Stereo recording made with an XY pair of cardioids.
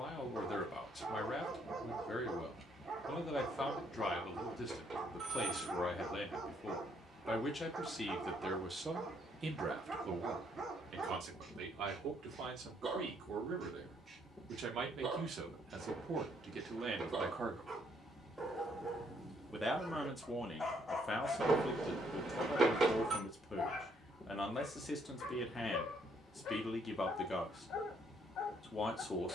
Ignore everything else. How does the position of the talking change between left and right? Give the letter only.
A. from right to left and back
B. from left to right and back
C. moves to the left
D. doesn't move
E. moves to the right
B.